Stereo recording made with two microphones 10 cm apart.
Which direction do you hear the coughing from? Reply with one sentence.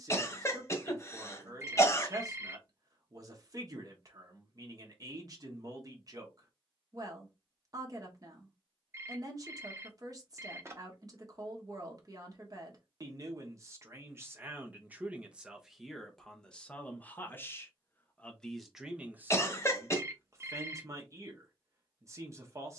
You can hear the coughing on the left.